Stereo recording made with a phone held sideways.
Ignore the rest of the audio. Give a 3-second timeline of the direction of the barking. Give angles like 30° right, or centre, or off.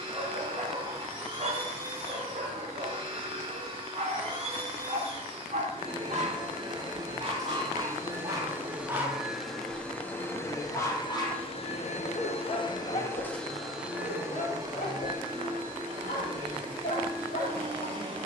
50° right, 50° right, 30° right, 20° left, 50° left, 60° left.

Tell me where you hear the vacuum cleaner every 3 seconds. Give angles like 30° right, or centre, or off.
30° right, 30° right, 20° right, 20° left, 10° left, 30° right.